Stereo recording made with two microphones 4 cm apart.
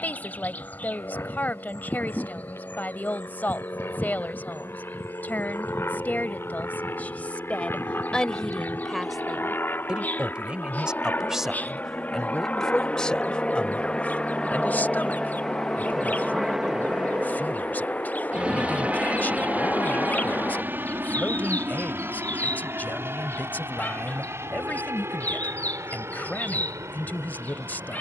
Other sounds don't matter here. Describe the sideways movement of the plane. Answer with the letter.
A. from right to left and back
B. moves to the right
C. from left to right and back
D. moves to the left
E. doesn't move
B.